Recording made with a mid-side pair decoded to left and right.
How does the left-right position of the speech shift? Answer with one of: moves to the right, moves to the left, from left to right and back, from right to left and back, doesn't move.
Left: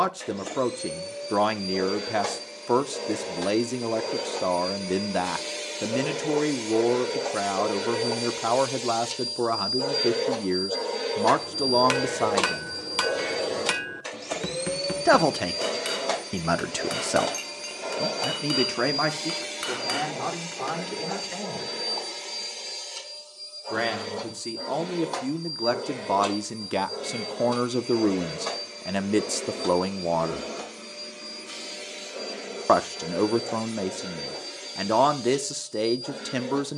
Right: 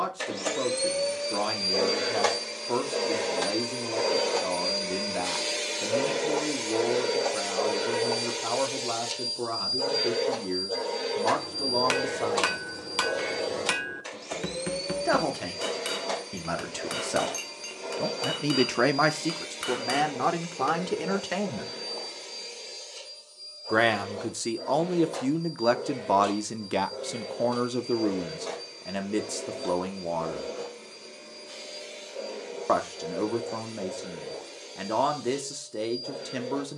from left to right and back.